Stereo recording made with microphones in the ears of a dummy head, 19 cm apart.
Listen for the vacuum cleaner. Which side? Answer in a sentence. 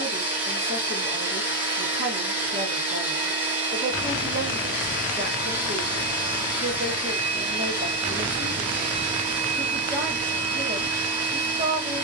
You can hear the vacuum cleaner on the right.